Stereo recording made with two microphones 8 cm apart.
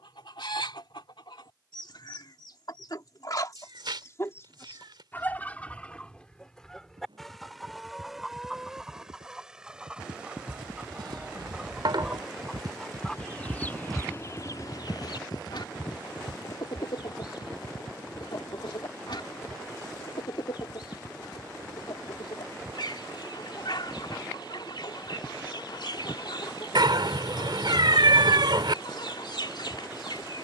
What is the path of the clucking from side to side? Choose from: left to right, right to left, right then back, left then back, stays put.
right then back.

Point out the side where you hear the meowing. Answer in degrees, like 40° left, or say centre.
70° right.